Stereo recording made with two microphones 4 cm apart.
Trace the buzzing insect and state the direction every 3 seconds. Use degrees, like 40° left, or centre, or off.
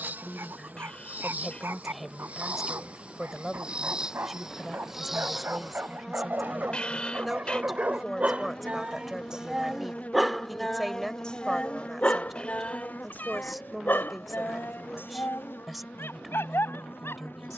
40° right, 20° right, 20° left, 40° left, 50° left, 60° left.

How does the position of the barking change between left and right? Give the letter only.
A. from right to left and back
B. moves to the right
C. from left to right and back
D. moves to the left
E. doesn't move
D.